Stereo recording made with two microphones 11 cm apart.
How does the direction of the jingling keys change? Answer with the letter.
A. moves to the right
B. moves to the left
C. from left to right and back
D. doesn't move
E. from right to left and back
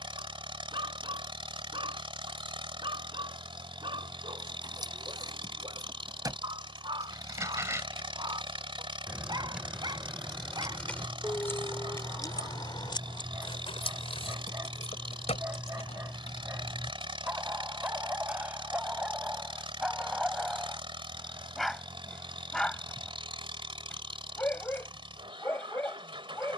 B.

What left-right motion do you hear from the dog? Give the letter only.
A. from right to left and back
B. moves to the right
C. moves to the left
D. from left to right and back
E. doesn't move
C.